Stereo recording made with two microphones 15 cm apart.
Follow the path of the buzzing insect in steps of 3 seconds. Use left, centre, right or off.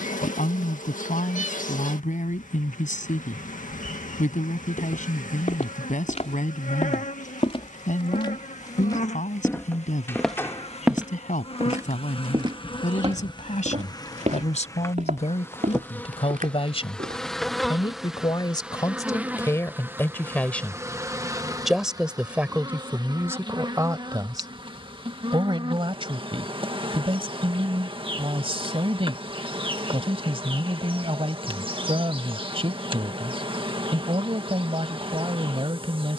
left, left, left, left, left, centre, centre, right, right, right, right, right.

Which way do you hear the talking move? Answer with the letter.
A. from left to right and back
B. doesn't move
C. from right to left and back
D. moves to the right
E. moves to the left
D.